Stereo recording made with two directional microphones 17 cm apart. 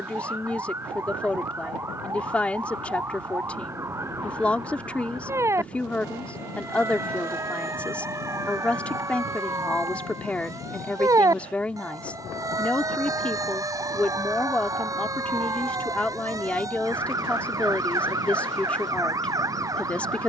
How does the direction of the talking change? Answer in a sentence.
In this clip you hear the talking stay in one place.